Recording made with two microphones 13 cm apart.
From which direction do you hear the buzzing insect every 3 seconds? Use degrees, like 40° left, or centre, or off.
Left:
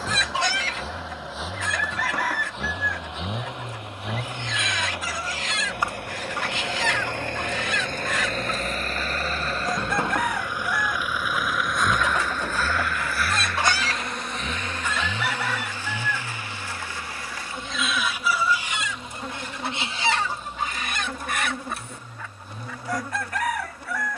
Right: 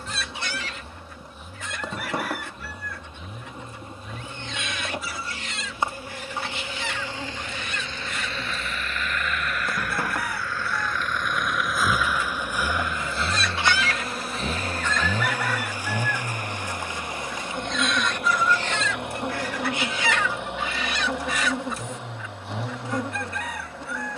20° right, 20° right, 20° right, 20° left, centre, 20° right, 20° right, 20° right.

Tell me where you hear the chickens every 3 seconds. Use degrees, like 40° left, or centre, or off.
80° left, 80° left, 80° left, 80° left, 40° left, centre, 20° left, 60° left.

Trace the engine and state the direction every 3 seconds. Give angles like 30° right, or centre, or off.
70° left, 60° left, 50° left, 20° left, 20° right, 50° right, 60° right, 70° right.